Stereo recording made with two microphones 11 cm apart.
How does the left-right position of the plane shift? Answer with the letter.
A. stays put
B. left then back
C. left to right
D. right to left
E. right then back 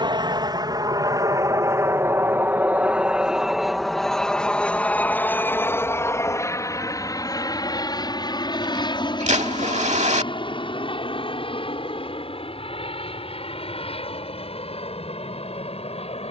D.